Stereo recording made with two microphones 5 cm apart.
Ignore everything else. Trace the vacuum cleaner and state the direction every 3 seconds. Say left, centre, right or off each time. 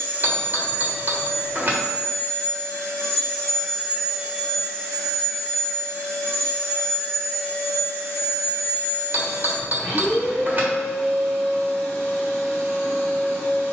left, centre, left, left, left.